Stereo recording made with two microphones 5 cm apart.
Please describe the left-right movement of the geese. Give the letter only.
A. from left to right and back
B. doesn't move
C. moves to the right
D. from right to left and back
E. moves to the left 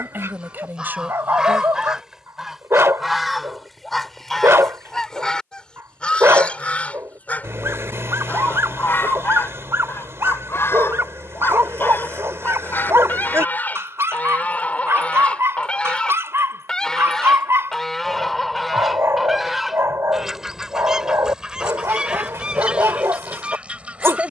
D.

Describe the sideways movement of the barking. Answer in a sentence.
In this clip you hear the barking stay put.